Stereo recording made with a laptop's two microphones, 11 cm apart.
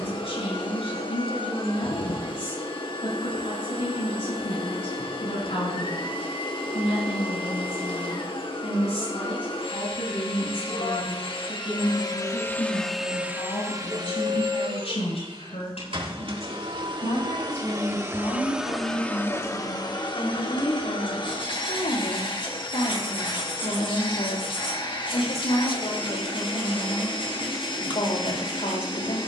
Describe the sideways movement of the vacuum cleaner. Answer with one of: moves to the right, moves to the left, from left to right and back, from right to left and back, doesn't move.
from left to right and back.